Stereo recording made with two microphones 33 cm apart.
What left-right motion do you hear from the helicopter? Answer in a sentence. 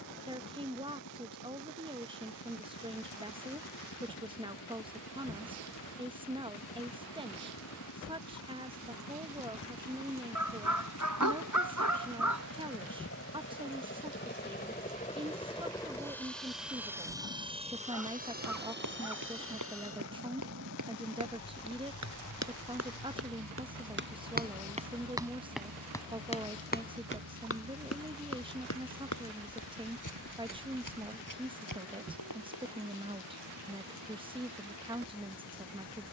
In this clip you hear the helicopter move to the right.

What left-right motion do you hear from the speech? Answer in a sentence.
You can hear the speech stay in one place.